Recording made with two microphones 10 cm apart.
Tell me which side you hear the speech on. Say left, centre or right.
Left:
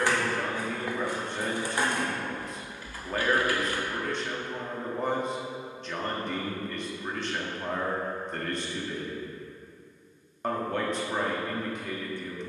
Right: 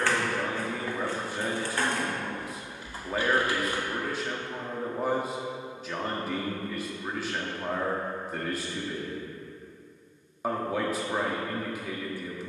centre.